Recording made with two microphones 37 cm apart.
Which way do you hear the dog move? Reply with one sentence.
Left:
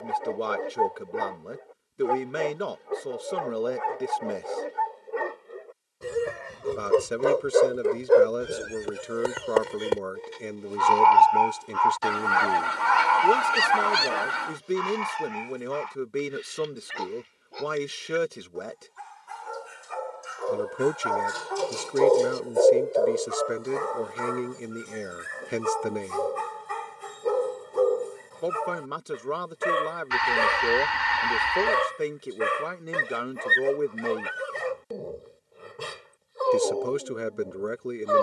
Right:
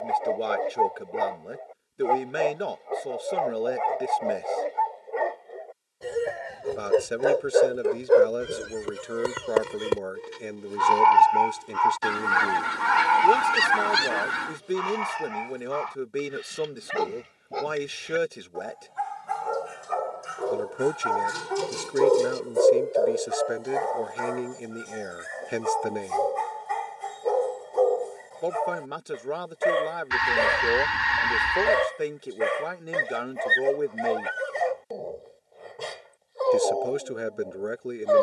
You can hear the dog go right and come back.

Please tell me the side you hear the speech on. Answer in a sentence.
In this clip you hear the speech in the centre.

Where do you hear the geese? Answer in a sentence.
You can hear the geese on the right.